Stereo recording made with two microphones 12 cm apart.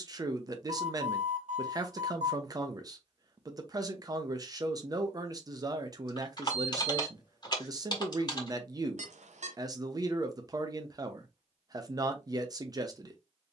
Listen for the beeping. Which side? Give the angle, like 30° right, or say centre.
70° right.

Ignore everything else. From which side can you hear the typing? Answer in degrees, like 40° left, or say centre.
40° left.